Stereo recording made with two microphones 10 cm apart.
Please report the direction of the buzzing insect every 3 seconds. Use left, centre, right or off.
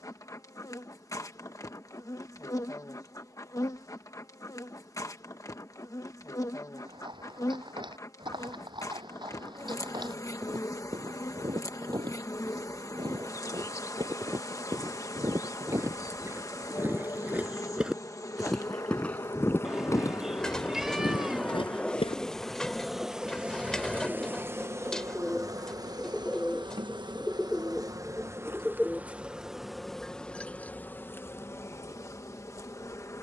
left, left, left, left, left, left, left, centre, right, right, left.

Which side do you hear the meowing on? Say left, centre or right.
centre.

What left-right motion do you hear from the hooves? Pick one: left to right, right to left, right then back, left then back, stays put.
right to left.